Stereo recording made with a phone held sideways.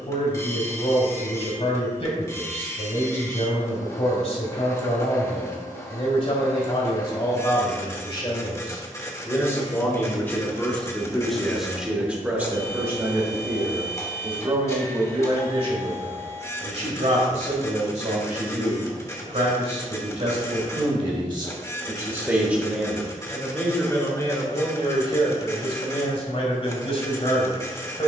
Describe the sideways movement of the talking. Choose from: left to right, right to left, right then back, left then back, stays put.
right then back.